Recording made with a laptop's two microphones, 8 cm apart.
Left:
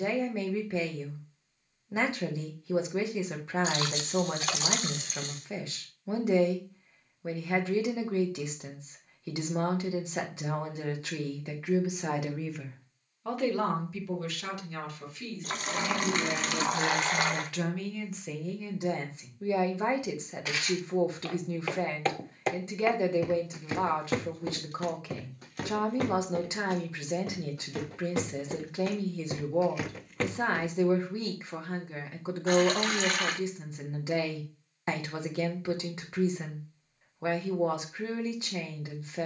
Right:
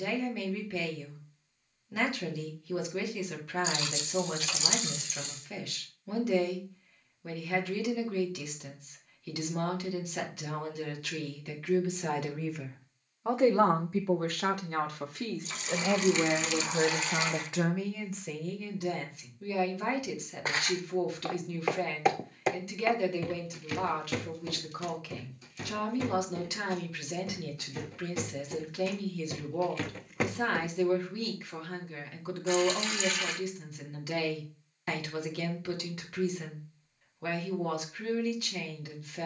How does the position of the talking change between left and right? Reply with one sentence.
You can hear the talking move from left to right and back again.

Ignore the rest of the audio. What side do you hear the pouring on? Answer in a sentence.
In this clip you hear the pouring on the left.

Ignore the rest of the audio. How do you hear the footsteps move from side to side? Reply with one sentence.
You can hear the footsteps move from right to left and back again.